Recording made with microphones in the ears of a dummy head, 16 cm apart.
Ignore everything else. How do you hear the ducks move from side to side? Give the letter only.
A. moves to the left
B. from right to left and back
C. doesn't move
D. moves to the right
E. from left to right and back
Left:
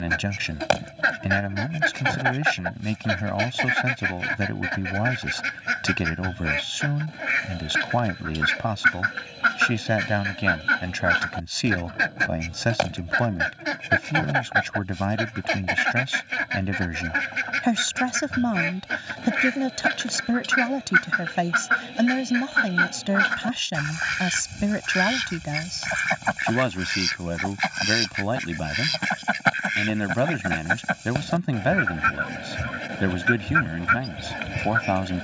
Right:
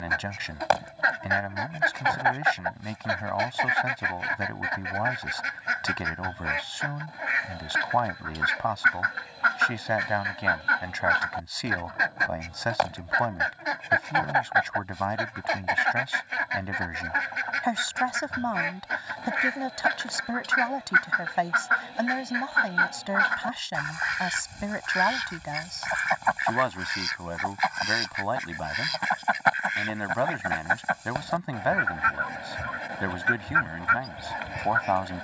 C.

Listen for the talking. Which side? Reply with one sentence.
You can hear the talking on the left.